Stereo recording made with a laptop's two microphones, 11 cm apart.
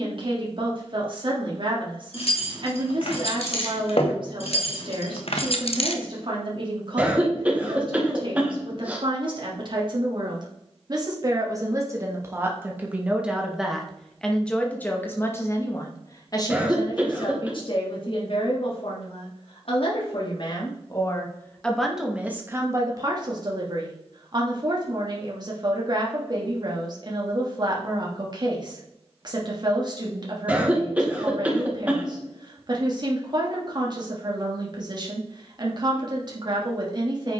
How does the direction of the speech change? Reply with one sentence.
You can hear the speech go left and come back.